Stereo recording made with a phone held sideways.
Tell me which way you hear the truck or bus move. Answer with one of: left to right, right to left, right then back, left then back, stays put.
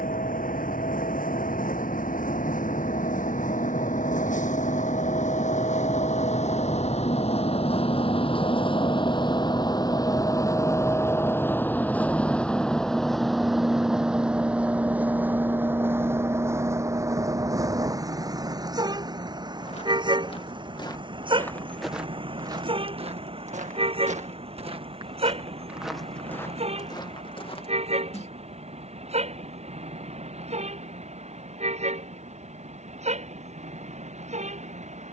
left to right.